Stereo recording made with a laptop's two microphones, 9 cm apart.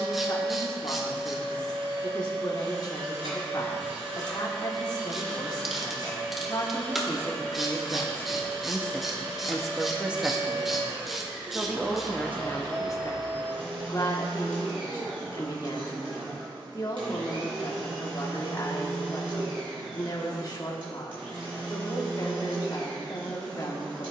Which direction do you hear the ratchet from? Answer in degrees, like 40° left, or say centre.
centre.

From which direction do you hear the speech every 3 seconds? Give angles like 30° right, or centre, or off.
50° left, 50° left, 30° left, 10° right, 40° left, 40° left, 40° left, 40° left.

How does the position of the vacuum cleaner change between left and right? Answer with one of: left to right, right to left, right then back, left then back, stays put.
stays put.